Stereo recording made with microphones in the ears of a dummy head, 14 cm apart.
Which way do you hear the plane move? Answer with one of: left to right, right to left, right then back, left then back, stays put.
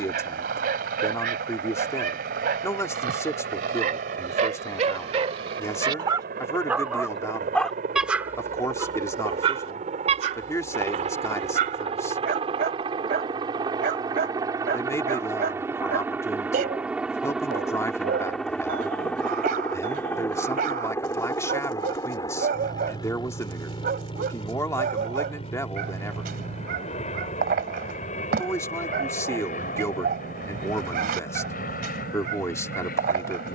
right to left.